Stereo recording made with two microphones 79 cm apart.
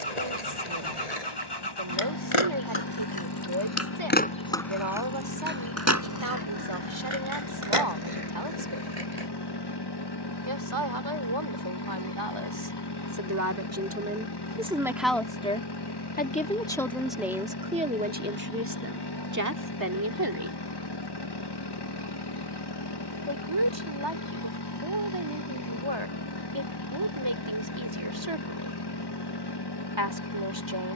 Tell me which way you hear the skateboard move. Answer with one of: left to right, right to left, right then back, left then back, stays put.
left to right.